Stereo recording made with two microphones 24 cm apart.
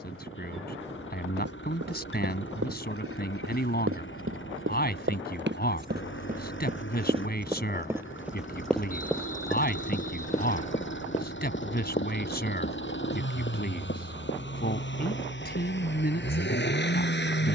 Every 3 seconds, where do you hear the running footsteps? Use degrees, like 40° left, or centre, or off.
70° right, 60° right, 20° right, 20° left, 40° left, off.